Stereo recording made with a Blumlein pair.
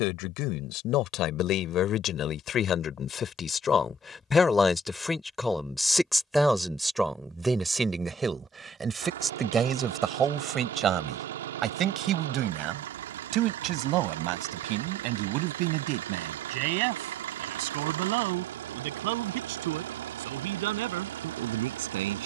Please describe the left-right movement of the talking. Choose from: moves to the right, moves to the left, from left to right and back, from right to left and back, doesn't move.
moves to the right.